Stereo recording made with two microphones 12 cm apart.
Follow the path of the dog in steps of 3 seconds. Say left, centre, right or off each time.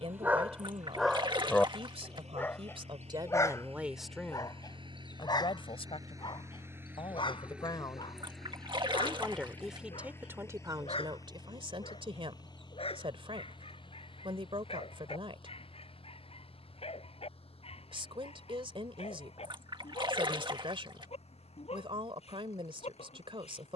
centre, left, left, left, left, left, left, left.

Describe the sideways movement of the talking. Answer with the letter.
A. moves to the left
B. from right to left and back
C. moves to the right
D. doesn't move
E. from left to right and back
B.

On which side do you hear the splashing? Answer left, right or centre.
right.